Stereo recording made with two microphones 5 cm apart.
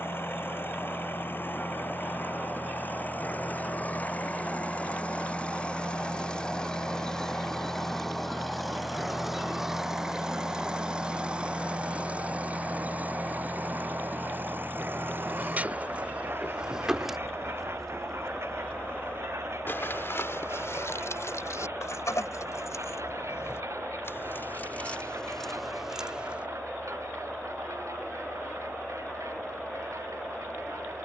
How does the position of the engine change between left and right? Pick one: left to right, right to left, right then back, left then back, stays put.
left to right.